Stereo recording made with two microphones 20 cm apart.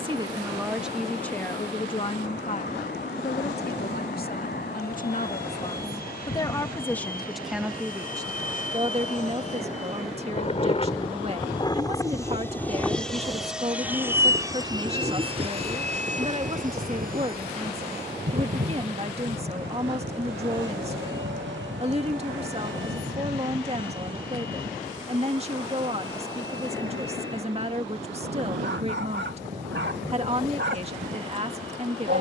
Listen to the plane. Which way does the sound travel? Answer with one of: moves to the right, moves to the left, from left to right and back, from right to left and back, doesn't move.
moves to the right.